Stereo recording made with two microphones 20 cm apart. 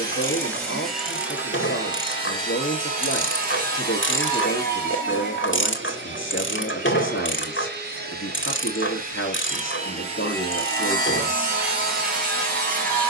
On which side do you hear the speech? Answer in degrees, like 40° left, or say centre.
80° left.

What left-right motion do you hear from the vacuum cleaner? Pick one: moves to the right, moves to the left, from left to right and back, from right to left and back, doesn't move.
from left to right and back.